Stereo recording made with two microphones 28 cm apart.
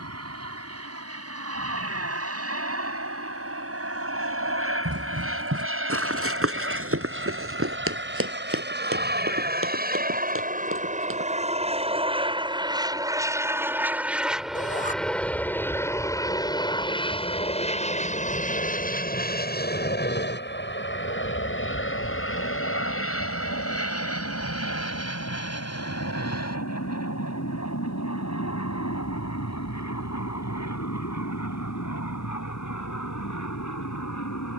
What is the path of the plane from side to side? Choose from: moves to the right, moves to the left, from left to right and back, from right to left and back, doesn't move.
moves to the left.